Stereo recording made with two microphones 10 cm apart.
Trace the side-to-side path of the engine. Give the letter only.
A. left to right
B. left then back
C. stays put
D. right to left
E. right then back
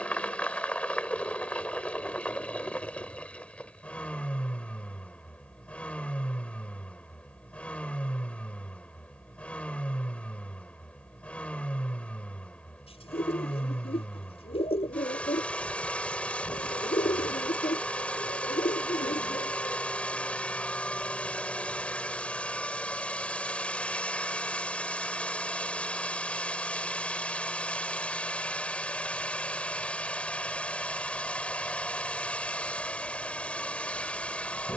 C.